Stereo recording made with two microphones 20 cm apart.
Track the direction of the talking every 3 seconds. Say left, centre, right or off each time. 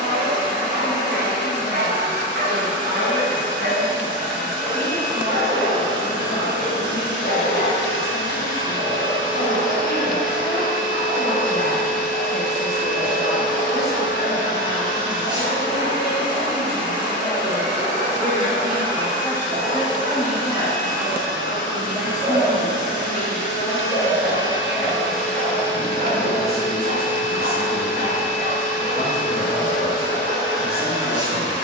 left, left, left, left, left, left, centre, centre, left, left, left.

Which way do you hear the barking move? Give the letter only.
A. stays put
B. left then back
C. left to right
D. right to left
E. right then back
A.